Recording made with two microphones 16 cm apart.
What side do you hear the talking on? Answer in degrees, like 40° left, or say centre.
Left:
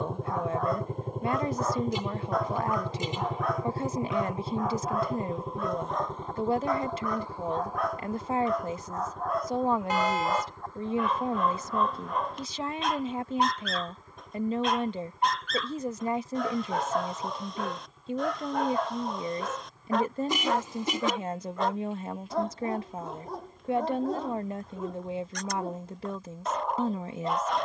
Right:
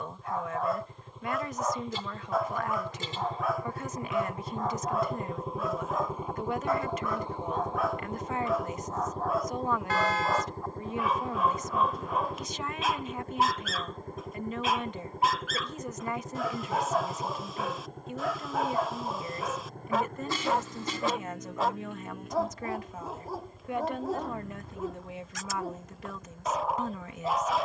30° left.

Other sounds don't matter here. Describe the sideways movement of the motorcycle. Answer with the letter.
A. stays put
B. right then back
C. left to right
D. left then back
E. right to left
C.